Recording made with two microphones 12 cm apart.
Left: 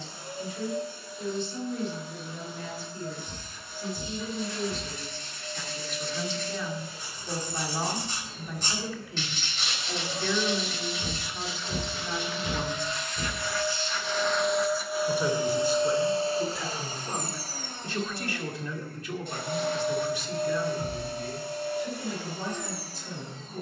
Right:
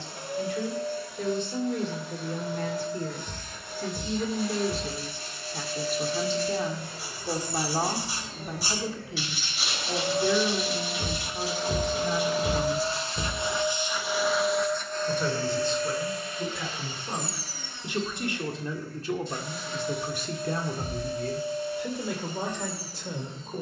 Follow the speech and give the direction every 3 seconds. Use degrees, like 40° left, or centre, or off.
70° right, 60° right, 40° right, 20° right, 10° right, centre, 40° right, 70° right.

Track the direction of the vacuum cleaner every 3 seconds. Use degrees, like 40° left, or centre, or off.
80° right, 80° right, 70° right, 60° right, 20° right, 30° left, 60° left, 70° left.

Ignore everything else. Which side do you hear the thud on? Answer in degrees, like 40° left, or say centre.
40° right.